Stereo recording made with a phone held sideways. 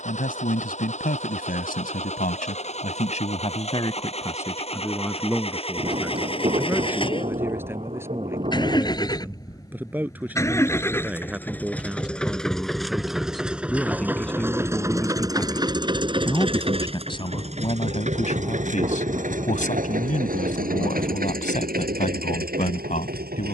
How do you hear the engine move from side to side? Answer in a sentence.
You can hear the engine move from left to right.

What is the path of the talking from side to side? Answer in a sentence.
You can hear the talking move from left to right and back again.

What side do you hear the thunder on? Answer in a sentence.
In this clip you hear the thunder on the right.